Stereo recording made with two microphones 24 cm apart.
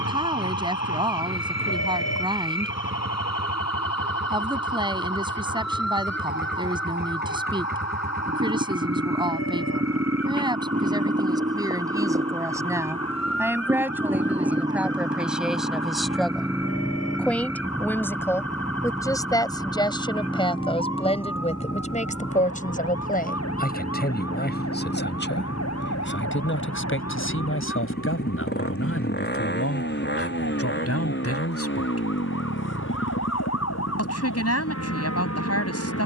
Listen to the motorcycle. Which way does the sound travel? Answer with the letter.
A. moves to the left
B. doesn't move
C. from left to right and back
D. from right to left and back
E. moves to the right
A.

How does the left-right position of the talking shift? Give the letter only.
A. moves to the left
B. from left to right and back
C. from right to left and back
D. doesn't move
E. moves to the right
A.